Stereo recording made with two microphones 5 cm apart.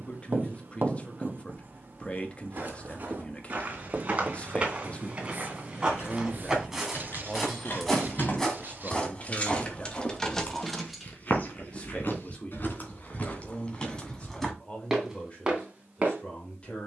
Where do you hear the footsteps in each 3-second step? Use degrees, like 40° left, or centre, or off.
40° right, 30° right, centre, 30° left, 30° left, 20° right.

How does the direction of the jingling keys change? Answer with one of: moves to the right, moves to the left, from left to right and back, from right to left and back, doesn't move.
moves to the right.